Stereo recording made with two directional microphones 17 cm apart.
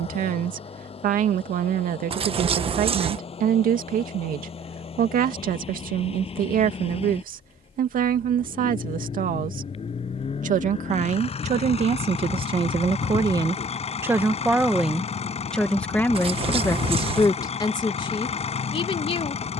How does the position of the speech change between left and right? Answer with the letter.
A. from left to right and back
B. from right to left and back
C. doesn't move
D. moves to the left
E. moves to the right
D.